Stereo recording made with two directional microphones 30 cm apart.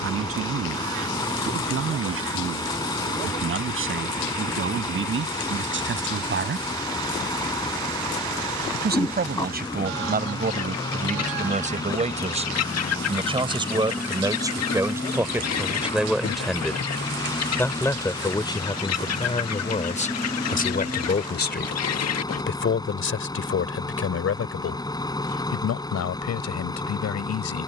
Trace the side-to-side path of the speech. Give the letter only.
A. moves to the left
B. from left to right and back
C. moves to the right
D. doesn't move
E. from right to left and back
A.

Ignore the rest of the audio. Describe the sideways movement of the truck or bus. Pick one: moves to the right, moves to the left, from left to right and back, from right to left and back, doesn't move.
doesn't move.